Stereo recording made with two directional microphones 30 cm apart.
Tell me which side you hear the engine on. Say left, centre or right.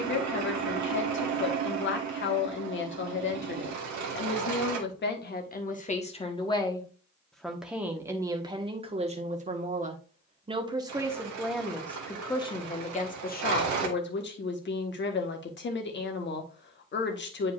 right.